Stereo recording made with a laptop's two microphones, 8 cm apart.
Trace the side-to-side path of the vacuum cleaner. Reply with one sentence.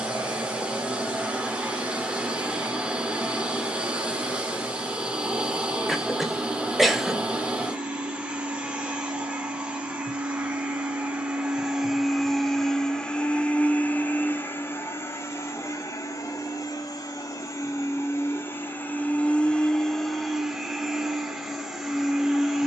You can hear the vacuum cleaner go left and come back.